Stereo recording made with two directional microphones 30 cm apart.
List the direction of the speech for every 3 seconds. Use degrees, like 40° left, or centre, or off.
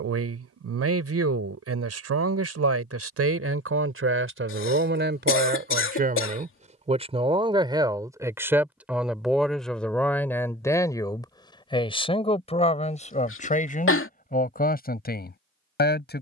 50° right, 40° right, 20° right, 10° left, 20° left, 30° left.